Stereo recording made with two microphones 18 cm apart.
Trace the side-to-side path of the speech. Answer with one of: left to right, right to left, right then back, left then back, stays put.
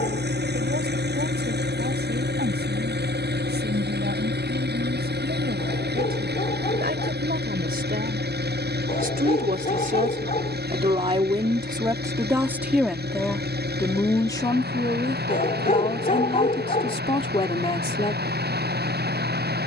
right to left.